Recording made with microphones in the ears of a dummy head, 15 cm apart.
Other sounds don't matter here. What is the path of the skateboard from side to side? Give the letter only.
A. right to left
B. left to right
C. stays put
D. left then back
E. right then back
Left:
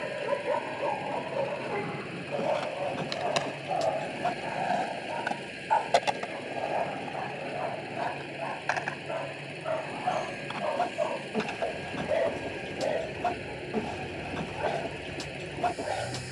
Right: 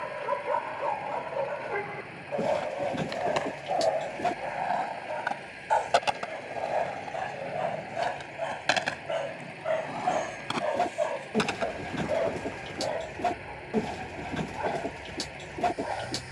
B.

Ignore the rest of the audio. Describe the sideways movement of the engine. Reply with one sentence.
You can hear the engine stay put.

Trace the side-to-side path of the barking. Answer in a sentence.
In this clip you hear the barking move from left to right and back again.